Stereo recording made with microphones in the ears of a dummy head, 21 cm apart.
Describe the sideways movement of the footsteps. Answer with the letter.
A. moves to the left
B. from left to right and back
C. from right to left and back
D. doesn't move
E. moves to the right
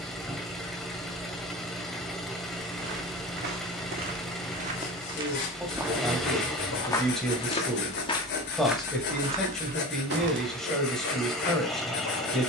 C.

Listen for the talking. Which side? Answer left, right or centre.
centre.